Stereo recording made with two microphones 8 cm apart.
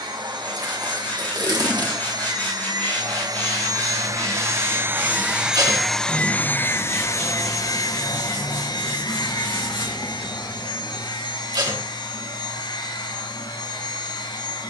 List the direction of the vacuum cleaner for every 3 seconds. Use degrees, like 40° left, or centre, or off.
70° right, 30° right, 40° left, 70° left, 70° left.